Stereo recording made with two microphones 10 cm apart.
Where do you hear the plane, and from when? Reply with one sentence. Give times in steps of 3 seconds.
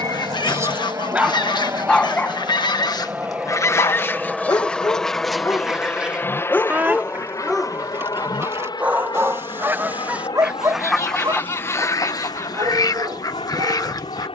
You can hear the plane on the right from 0 s, in the centre from 3 s and on the left from 6 s.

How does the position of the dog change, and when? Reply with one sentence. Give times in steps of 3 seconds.
In this clip you hear the dog in the centre from 0 s, on the left from 3 s, in the centre from 6 s and on the right from 9 s.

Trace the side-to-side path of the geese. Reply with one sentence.
In this clip you hear the geese move from left to right and back again.